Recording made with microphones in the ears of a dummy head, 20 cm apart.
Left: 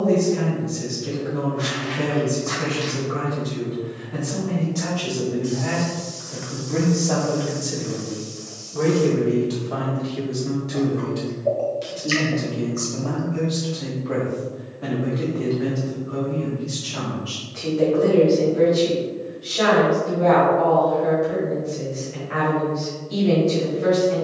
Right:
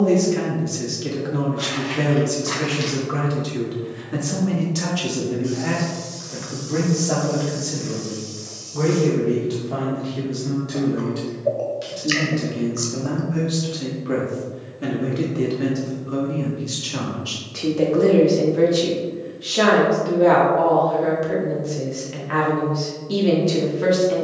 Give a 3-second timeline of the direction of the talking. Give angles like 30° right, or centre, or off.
70° right, 50° right, centre, centre, 20° right, 40° right, 60° right, 70° right.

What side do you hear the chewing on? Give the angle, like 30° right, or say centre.
20° right.